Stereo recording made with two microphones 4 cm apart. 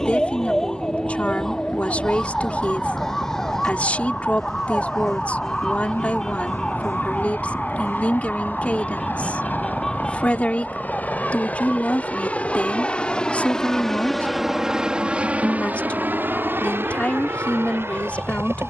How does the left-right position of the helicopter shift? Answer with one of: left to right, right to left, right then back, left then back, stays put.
left to right.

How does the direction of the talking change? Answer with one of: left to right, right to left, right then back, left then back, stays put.
stays put.